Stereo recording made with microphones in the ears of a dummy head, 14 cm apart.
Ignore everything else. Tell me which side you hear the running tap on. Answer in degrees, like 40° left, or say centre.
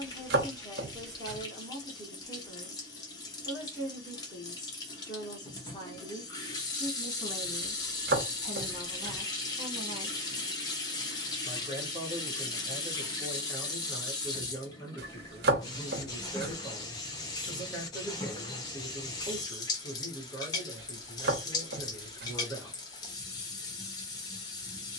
20° left.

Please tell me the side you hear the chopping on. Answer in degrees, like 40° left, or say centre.
70° right.